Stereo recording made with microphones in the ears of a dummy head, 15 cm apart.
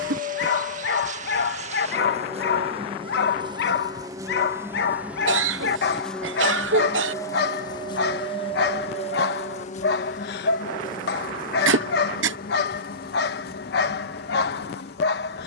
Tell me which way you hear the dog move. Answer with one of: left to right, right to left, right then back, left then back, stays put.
stays put.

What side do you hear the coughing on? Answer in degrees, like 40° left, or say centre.
80° right.